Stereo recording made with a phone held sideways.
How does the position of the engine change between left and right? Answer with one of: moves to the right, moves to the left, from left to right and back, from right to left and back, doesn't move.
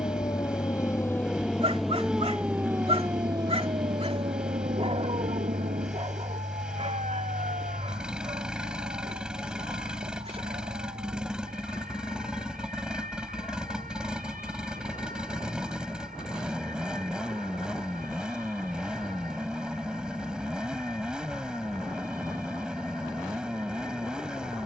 doesn't move.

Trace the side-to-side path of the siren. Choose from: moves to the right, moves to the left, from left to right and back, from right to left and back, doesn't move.
moves to the right.